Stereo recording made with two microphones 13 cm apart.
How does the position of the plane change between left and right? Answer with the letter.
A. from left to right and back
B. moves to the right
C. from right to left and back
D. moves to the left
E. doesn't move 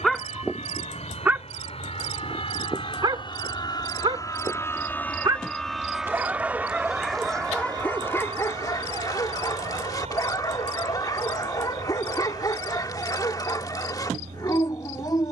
B.